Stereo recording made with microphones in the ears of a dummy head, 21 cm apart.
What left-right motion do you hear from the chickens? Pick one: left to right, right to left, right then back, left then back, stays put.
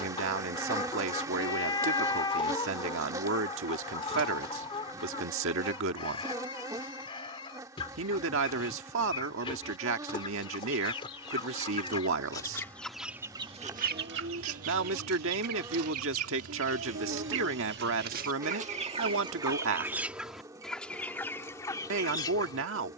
right then back.